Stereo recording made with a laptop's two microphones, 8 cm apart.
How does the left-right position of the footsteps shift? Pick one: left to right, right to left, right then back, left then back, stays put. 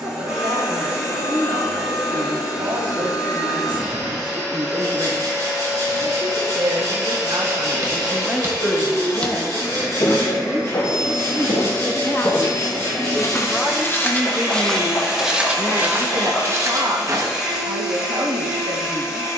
left then back.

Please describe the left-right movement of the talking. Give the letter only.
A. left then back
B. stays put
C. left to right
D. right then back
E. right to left
A.